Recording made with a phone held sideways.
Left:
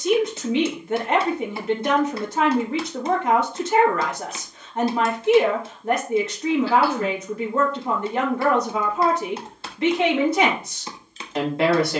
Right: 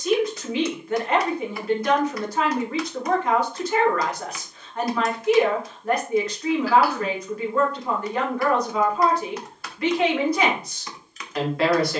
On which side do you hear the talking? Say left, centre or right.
left.